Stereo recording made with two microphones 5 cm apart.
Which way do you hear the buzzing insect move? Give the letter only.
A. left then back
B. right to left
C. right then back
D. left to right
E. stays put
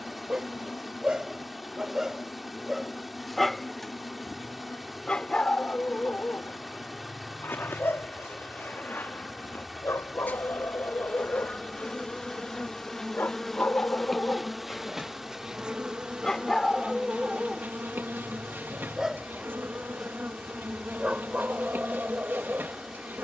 D.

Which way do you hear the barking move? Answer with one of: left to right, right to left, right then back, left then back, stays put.
left then back.